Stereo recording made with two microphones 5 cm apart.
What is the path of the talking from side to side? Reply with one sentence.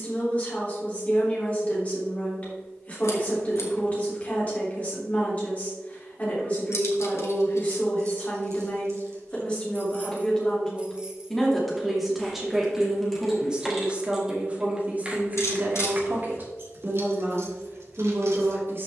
In this clip you hear the talking move to the right.